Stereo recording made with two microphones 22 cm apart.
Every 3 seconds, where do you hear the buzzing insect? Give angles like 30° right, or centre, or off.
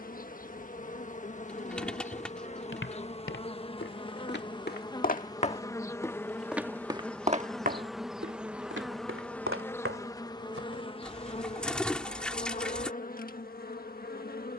30° left, 20° left, centre, 20° left, 40° left.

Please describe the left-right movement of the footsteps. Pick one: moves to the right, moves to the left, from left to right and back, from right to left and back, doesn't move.
moves to the right.